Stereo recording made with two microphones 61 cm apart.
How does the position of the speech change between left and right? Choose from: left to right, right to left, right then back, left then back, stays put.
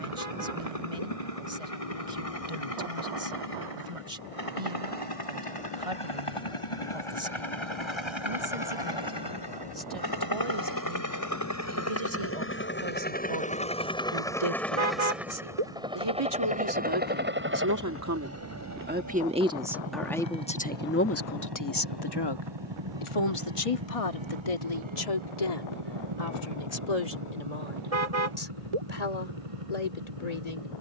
right to left.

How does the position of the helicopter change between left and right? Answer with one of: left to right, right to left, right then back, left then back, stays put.
left to right.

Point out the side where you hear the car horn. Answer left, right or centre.
right.